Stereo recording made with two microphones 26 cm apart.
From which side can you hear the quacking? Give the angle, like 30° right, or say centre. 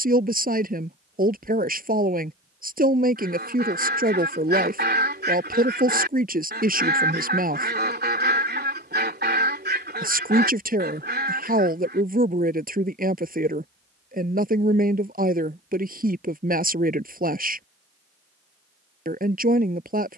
40° right.